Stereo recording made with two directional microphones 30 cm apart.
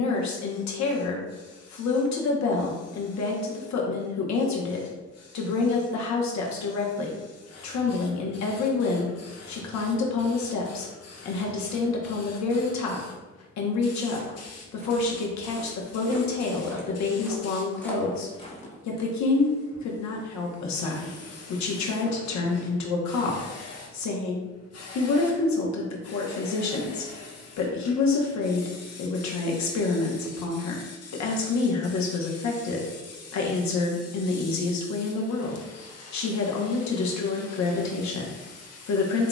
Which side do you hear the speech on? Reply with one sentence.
In this clip you hear the speech on the left.